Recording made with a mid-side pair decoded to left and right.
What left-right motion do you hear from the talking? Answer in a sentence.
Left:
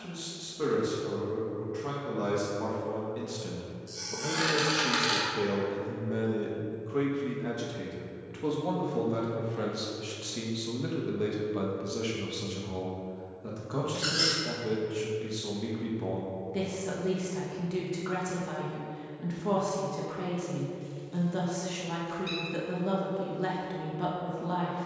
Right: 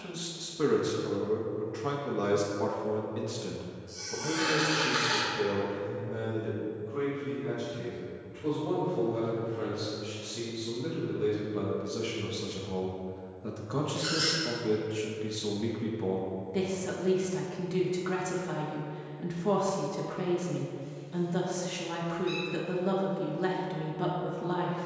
You can hear the talking move from right to left and back again.